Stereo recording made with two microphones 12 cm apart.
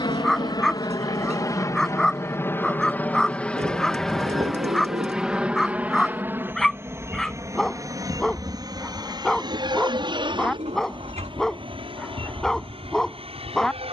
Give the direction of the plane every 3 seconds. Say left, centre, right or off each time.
left, centre, right, right, right.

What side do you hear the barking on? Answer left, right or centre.
centre.